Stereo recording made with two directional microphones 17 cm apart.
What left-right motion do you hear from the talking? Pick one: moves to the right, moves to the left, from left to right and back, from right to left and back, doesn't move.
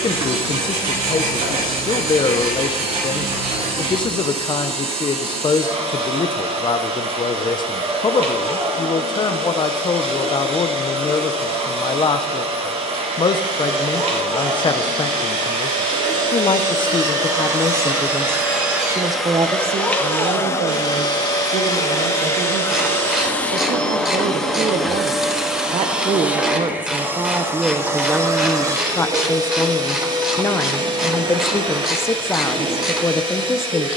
from left to right and back.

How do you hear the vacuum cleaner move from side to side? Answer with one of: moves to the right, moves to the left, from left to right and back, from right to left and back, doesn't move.
from right to left and back.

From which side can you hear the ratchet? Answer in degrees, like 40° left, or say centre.
centre.